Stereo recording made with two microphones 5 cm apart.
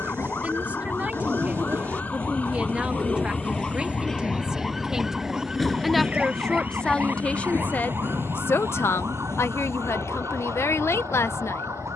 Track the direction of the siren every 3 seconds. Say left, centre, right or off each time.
left, centre, right, right.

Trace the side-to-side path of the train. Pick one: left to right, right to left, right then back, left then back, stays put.
right to left.